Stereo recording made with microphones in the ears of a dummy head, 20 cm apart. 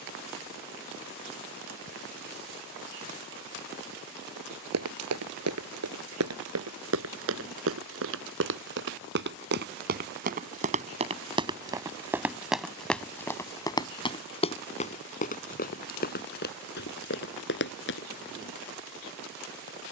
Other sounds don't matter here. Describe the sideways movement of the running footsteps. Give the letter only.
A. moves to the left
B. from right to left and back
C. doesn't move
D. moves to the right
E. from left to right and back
A.